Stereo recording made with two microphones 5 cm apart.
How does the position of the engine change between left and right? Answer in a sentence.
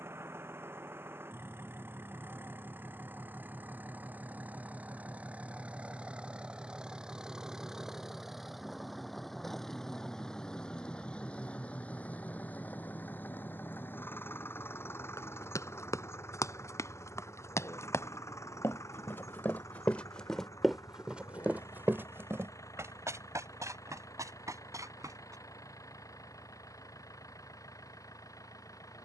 In this clip you hear the engine go from the right side to the left.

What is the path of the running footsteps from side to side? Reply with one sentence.
In this clip you hear the running footsteps move from left to right.